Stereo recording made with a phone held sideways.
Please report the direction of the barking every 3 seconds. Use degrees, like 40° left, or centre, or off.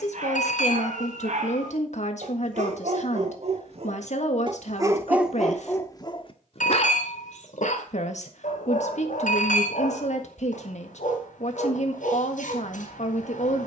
70° right, 30° right, 60° left, 80° left, 80° left.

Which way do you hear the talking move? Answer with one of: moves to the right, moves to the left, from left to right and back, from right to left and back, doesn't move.
doesn't move.